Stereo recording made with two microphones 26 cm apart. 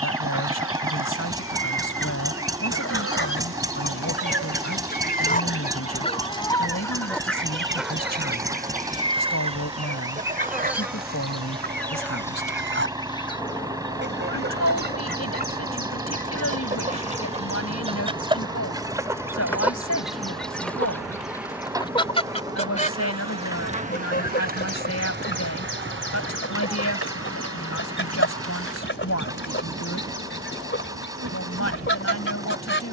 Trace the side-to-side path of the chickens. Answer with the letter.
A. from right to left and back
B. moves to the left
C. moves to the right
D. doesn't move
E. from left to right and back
E.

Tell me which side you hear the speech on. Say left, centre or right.
left.